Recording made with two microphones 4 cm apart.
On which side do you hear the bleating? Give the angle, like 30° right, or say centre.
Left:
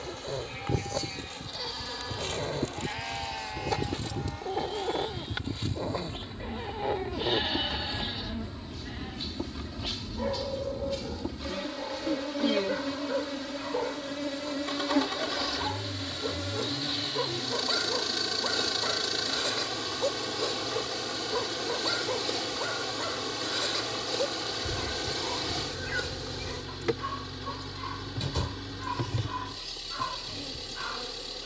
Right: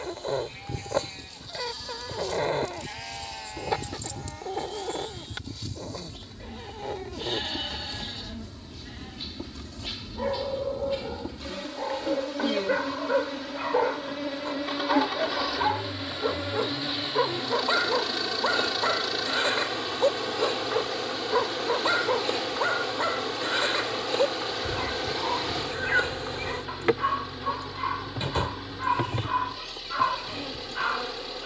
10° left.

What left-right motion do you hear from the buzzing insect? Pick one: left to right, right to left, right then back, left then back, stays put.
left to right.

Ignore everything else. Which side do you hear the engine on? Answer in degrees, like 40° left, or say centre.
10° right.